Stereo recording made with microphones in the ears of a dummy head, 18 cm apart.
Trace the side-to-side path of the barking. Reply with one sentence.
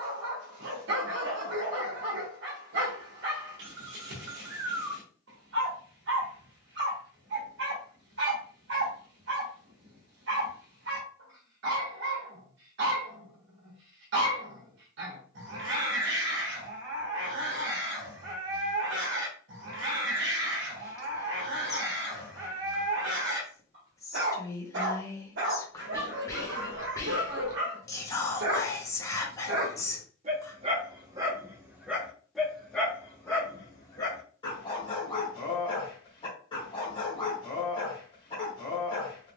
In this clip you hear the barking move from right to left.